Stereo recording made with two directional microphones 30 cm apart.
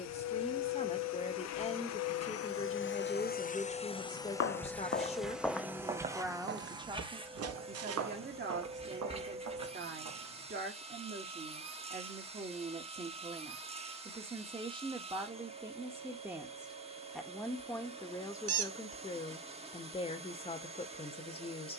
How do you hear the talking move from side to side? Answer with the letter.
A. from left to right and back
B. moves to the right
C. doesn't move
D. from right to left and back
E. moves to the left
A.